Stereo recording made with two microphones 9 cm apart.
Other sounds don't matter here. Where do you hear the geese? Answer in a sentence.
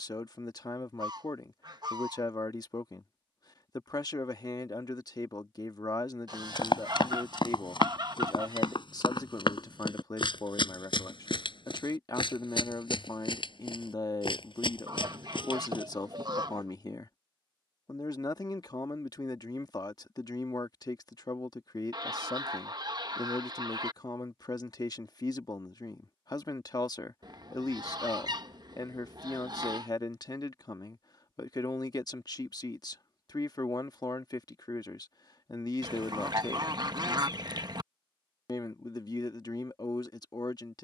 In this clip you hear the geese on the right.